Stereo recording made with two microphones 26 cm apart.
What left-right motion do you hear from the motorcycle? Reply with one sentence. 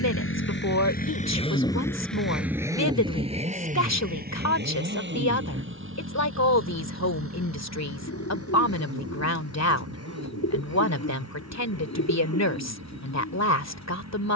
You can hear the motorcycle go from the left side to the right.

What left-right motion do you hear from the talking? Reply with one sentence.
You can hear the talking stay in one place.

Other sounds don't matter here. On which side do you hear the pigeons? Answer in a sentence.
In this clip you hear the pigeons on the left.